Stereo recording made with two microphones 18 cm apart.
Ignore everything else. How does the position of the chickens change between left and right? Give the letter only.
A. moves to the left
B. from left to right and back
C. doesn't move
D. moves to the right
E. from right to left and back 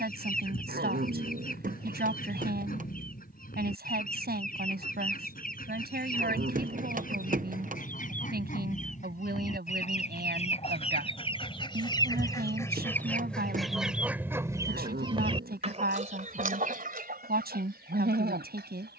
D.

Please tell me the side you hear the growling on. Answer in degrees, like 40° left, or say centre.
60° right.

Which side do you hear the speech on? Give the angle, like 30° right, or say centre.
60° right.